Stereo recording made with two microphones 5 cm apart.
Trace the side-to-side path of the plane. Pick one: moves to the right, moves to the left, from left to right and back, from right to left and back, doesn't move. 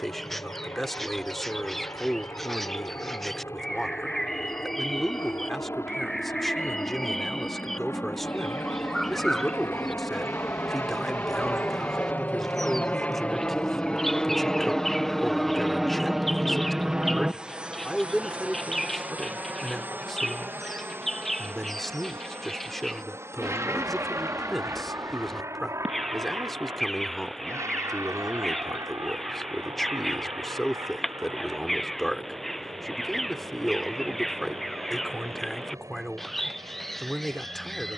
moves to the right.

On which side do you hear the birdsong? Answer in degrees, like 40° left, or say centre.
10° left.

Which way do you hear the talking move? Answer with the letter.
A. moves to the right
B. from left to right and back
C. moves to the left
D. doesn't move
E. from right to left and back
D.